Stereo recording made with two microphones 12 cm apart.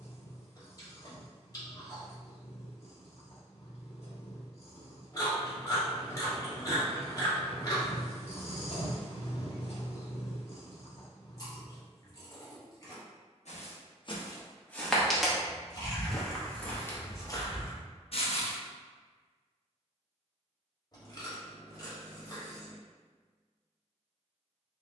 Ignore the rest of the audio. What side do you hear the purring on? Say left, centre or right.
left.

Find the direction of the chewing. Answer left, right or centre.
left.